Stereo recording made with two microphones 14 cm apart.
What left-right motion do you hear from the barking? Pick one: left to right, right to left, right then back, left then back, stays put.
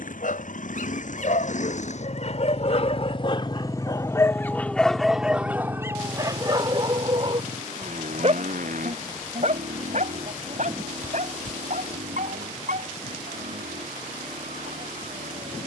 left to right.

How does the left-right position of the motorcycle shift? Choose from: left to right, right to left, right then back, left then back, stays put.
left to right.